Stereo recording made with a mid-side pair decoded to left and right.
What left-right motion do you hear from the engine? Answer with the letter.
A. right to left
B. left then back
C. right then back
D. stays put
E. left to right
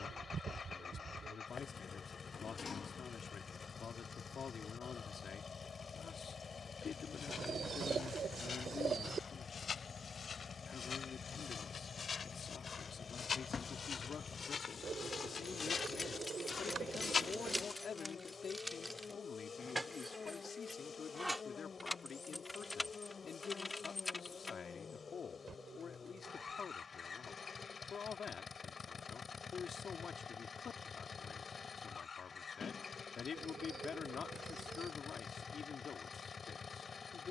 D.